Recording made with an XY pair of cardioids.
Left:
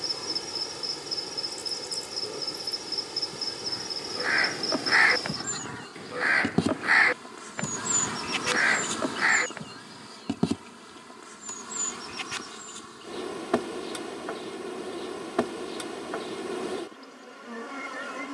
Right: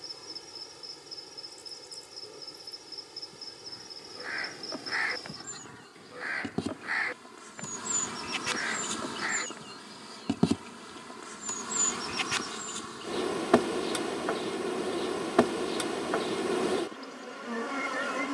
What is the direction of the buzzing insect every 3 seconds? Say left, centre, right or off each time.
left, left, left, centre, right, right.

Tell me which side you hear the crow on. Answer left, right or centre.
left.